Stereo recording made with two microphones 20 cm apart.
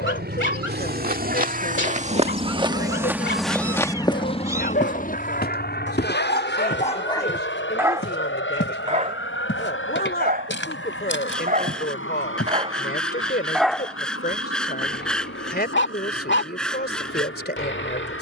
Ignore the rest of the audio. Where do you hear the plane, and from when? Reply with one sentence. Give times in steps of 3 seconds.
In this clip you hear the plane on the right from 0 s and on the left from 3 s.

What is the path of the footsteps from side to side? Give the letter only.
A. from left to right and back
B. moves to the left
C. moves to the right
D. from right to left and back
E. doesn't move
B.